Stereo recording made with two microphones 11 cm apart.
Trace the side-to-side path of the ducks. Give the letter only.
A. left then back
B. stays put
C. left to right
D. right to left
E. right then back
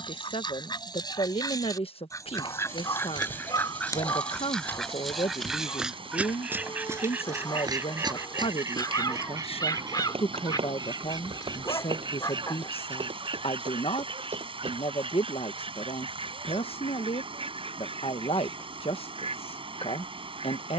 C.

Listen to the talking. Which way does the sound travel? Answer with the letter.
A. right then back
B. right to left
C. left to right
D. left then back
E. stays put
E.